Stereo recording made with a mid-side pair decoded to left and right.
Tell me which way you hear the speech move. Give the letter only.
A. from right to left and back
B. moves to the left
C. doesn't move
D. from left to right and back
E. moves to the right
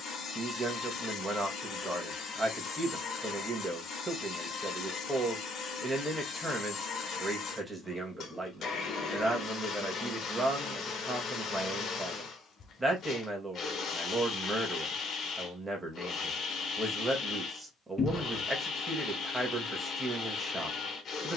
C.